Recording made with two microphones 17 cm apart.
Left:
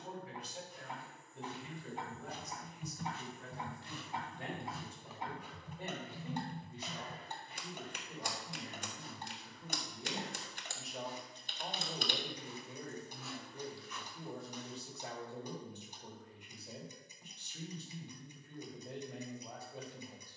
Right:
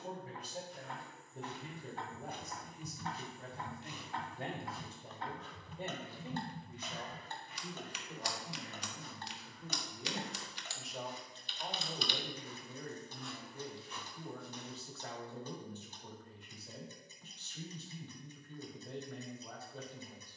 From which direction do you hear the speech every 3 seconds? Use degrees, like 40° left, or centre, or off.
40° right, 40° right, 20° right, centre, 20° left, 20° left, 20° left.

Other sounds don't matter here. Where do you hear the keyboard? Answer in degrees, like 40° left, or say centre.
50° left.